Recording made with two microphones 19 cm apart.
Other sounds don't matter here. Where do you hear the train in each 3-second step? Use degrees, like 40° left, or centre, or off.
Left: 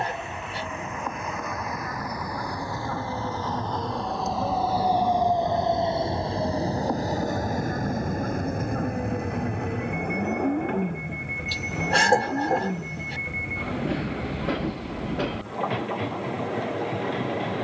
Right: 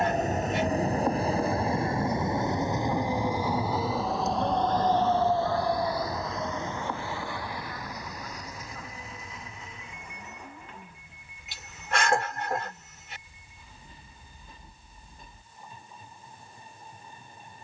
30° right, centre, 40° left, 70° left, 80° left, 80° left.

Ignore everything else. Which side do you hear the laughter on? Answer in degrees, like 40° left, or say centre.
40° left.